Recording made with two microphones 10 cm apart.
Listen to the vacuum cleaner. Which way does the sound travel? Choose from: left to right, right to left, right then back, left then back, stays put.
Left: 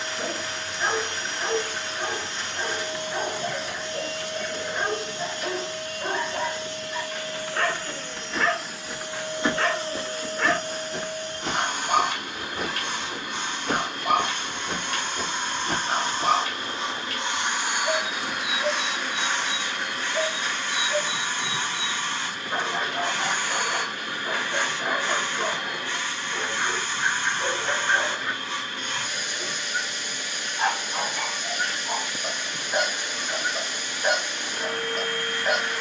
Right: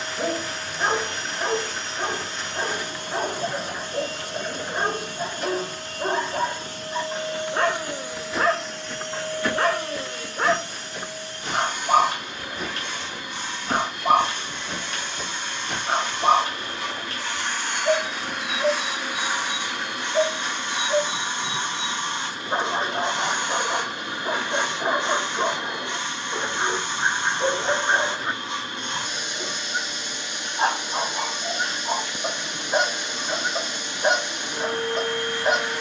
left then back.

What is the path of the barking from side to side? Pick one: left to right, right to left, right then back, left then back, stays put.
stays put.